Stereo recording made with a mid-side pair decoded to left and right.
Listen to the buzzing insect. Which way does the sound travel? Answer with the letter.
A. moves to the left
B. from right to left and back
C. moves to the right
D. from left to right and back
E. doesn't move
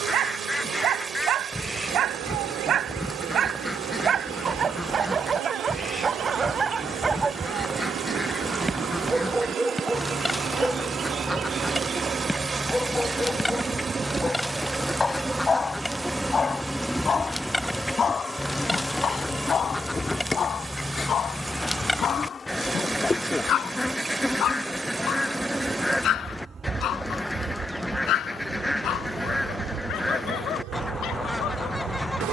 B.